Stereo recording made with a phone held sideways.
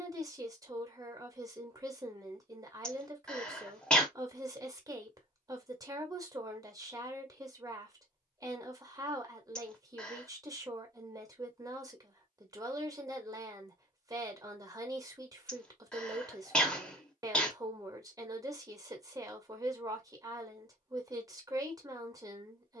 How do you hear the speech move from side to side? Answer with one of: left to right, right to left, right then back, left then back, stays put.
stays put.